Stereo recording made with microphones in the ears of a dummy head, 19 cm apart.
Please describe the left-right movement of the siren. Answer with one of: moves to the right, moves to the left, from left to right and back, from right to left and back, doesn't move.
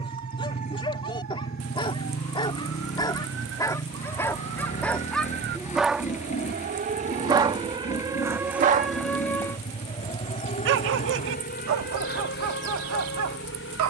moves to the left.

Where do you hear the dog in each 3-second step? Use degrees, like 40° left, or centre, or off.
20° left, 10° left, 20° right, 50° right, 70° right.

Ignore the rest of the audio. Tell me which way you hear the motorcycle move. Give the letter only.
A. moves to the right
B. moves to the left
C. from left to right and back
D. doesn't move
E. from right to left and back
D.